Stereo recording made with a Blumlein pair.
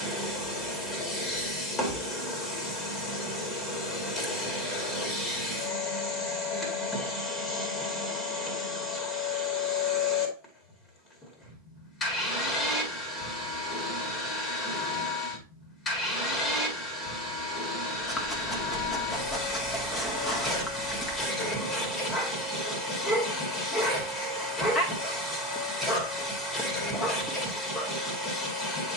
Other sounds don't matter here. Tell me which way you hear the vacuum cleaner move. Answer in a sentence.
You can hear the vacuum cleaner stay in one place.